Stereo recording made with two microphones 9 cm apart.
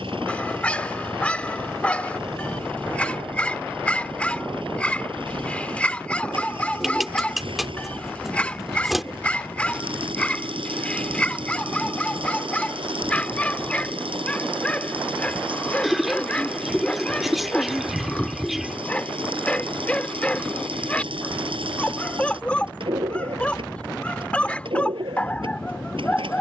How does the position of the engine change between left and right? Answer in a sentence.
You can hear the engine stay in one place.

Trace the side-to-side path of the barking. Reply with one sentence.
In this clip you hear the barking stay in one place.